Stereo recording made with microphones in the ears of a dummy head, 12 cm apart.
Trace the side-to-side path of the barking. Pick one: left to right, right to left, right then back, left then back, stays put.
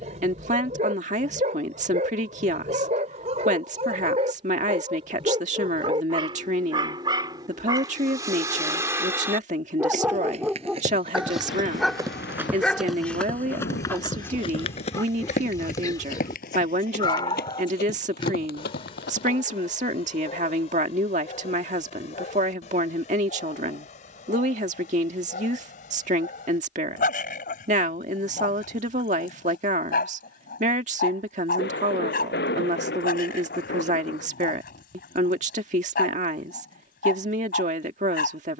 right to left.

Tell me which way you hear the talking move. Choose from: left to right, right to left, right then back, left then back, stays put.
stays put.